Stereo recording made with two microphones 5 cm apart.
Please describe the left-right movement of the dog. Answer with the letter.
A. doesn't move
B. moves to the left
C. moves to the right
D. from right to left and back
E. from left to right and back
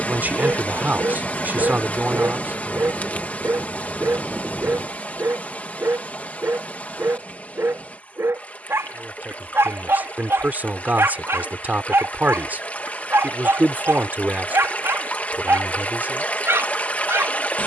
A.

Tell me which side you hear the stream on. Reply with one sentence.
You can hear the stream on the left.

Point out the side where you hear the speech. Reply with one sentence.
In this clip you hear the speech on the right.